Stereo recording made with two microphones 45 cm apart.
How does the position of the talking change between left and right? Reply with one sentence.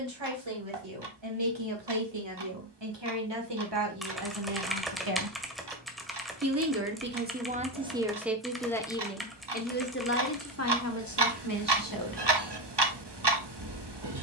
In this clip you hear the talking move to the left.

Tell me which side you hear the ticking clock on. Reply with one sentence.
You can hear the ticking clock on the right.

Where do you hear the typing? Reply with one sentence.
You can hear the typing in the centre.